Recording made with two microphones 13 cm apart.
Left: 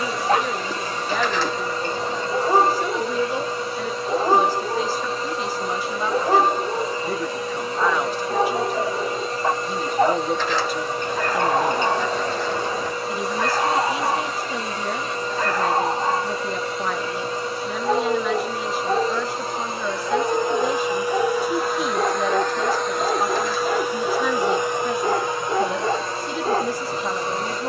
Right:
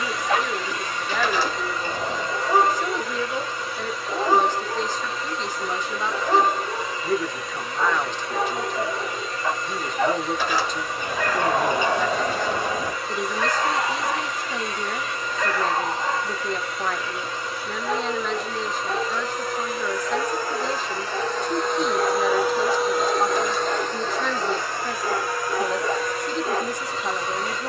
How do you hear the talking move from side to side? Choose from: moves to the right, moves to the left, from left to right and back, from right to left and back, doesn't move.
doesn't move.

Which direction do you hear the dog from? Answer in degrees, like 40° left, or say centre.
40° left.